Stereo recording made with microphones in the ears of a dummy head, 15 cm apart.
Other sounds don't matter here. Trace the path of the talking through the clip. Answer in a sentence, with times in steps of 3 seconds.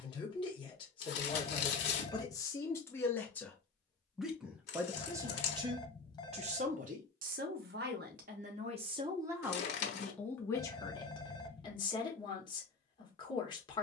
You can hear the talking on the left from 0 s, in the centre from 3 s, on the right from 6 s, in the centre from 9 s and on the left from 12 s.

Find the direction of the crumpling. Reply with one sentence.
In this clip you hear the crumpling on the left.